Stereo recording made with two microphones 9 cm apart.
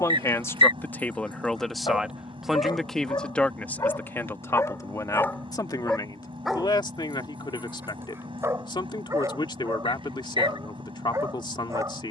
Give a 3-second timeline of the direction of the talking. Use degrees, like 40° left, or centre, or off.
10° left, 30° left, 60° left, 60° left.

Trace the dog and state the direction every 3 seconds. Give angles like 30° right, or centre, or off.
60° left, 30° left, 20° right, 40° right.